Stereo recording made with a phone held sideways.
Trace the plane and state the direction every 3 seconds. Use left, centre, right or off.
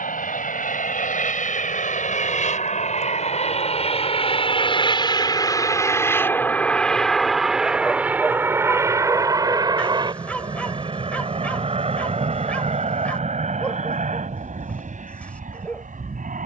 left, left, centre, right, right, right.